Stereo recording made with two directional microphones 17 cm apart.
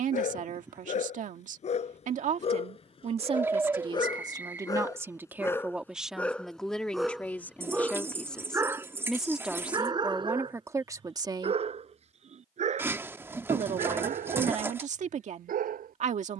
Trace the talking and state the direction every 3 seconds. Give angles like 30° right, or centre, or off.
50° right, 20° right, 10° left, 10° right, 40° right, 40° right.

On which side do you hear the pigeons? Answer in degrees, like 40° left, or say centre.
10° right.